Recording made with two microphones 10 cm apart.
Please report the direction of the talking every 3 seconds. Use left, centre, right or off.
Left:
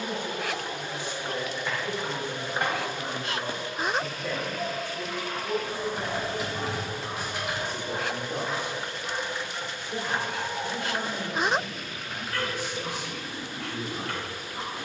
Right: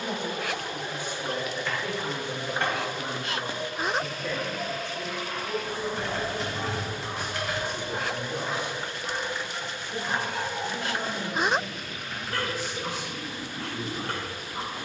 right, centre, left, left, left.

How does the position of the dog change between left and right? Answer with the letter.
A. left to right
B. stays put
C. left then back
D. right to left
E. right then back
C.